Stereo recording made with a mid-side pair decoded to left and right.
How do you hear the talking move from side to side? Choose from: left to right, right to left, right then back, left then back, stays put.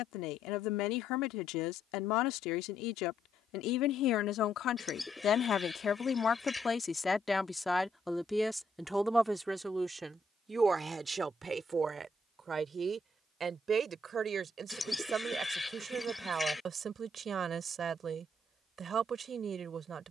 left to right.